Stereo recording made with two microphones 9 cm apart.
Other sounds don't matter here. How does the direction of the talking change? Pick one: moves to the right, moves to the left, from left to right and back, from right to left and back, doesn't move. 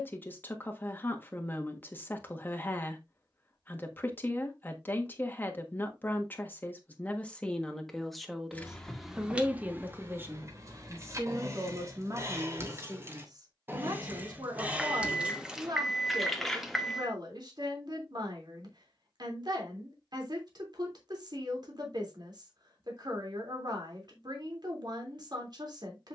moves to the right.